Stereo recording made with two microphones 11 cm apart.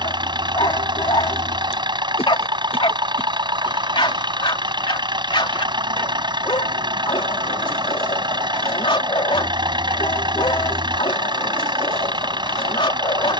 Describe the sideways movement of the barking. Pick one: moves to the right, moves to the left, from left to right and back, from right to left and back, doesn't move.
doesn't move.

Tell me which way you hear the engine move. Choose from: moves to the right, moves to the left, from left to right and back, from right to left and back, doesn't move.
doesn't move.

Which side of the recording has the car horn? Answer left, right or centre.
left.